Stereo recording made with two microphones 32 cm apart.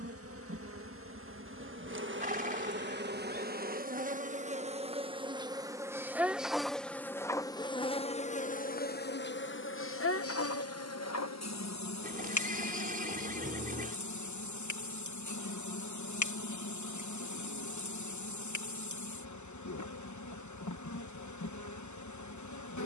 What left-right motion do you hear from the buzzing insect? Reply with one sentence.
In this clip you hear the buzzing insect move to the left.